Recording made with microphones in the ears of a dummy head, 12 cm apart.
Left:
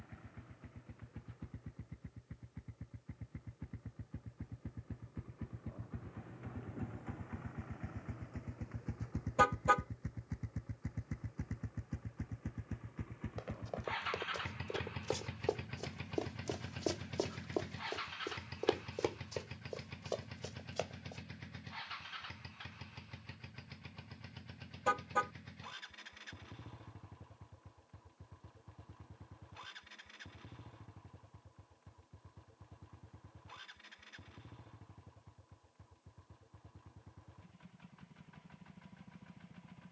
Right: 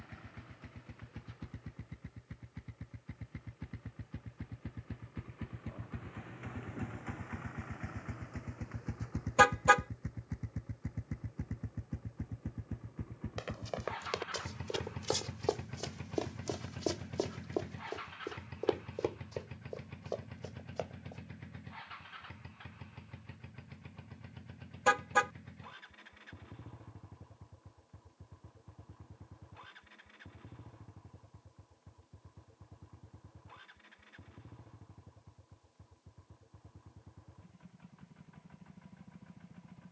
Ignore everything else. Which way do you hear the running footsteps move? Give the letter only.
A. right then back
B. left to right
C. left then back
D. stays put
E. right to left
E.